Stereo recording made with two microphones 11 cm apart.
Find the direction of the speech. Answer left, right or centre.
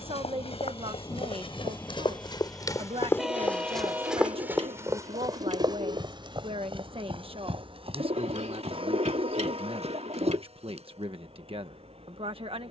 right.